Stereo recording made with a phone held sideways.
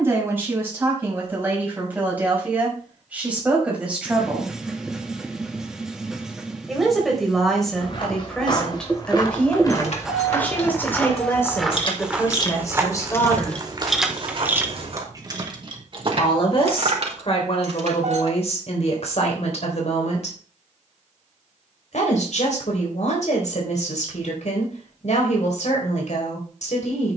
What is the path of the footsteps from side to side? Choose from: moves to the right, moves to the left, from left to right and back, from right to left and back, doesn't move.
moves to the right.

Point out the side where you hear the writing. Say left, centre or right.
centre.